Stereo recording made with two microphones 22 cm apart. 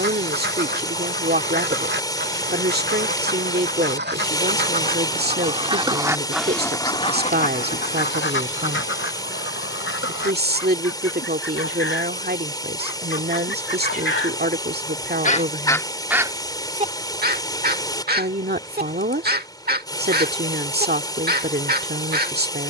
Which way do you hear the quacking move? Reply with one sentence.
In this clip you hear the quacking move from right to left and back again.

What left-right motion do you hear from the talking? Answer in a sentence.
You can hear the talking stay in one place.